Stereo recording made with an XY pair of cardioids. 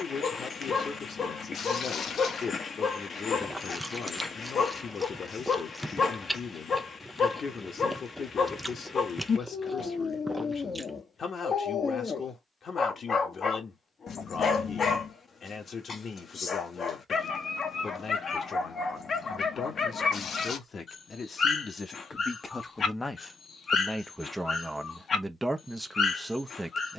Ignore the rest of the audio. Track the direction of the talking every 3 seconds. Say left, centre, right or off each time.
left, left, left, left, left, left, left, left, centre.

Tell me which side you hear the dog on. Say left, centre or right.
left.